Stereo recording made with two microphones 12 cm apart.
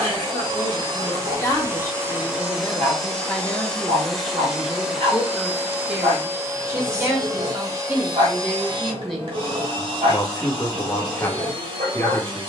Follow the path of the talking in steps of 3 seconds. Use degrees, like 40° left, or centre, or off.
20° left, centre, 10° right, 20° left.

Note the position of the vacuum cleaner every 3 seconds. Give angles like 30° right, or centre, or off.
30° right, centre, 30° right, 50° right.